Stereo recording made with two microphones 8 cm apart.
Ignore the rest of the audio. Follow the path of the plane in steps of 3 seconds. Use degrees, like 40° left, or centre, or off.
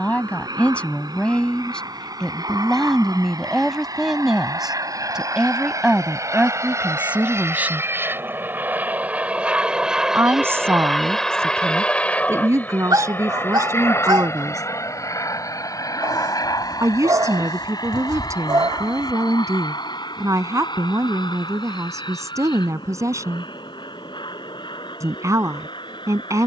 70° right, 60° right, 40° right, centre, 30° left, 50° left, 60° left, 70° left, 70° left.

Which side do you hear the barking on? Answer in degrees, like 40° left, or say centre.
60° right.